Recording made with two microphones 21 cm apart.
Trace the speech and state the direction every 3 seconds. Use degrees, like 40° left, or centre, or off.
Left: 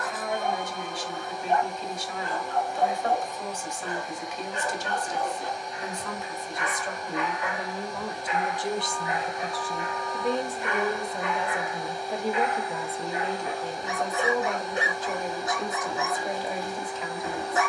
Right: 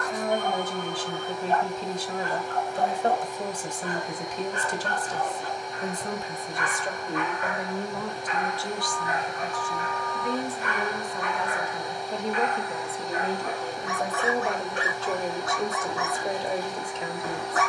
40° right, 40° right, 10° right, 30° left, 10° right, 30° right.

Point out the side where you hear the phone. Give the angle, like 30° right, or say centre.
centre.